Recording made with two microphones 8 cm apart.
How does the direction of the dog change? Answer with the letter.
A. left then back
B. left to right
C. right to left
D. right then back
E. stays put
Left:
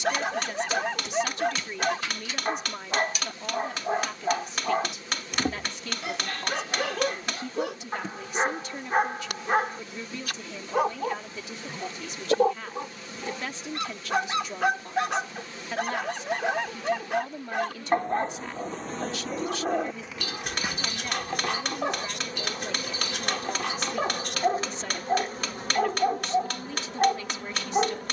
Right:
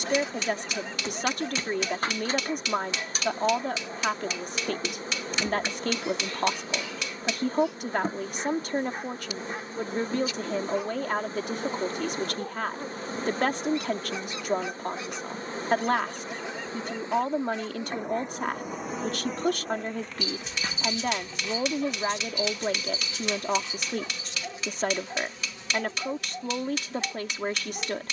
E.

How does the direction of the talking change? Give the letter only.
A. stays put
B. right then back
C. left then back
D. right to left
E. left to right
A.